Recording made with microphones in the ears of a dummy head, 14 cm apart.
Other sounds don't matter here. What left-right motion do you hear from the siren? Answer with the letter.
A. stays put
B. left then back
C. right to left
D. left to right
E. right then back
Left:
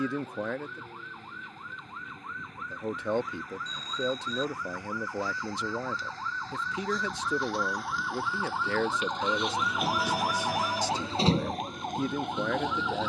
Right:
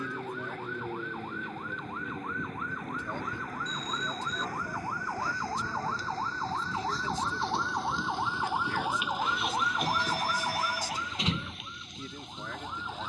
C.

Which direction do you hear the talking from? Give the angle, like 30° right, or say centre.
60° left.